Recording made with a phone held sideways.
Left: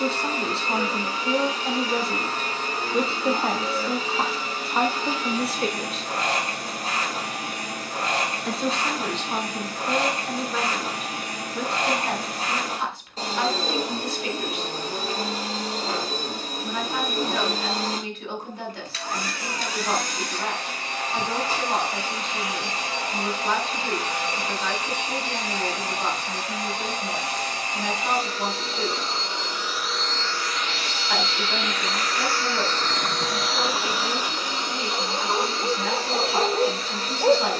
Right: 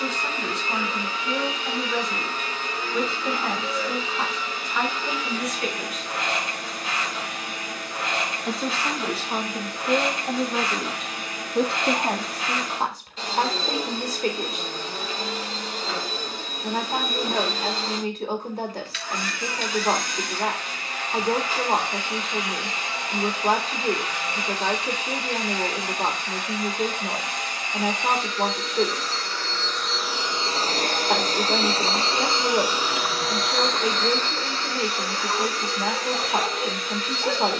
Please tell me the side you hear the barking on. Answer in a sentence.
In this clip you hear the barking on the left.